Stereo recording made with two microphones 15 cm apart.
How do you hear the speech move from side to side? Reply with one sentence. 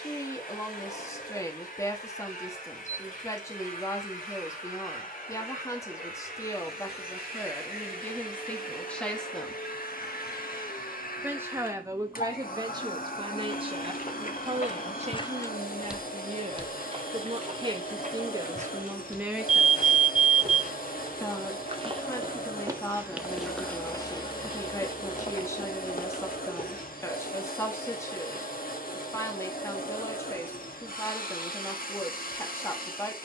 In this clip you hear the speech move from left to right and back again.